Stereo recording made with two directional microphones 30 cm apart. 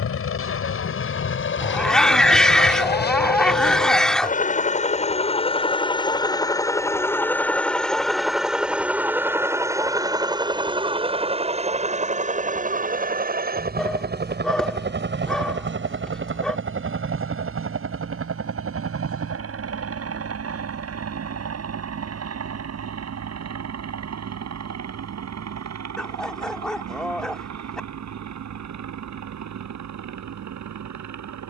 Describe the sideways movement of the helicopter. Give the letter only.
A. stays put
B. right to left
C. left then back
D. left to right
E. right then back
D.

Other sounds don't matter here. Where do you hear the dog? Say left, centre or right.
centre.